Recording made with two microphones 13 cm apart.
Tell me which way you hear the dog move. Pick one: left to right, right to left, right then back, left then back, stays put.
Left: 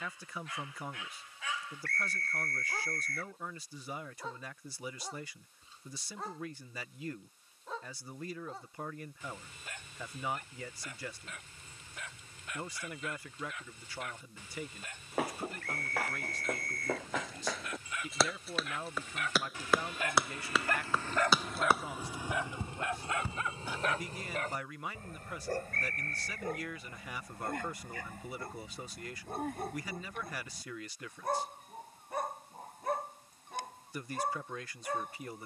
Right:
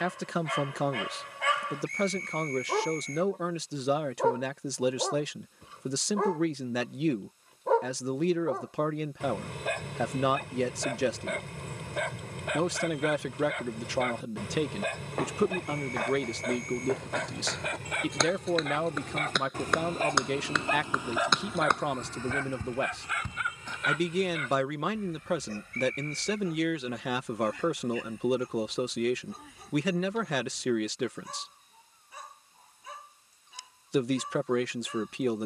right to left.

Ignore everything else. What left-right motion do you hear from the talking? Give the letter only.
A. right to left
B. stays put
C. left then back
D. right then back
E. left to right
B.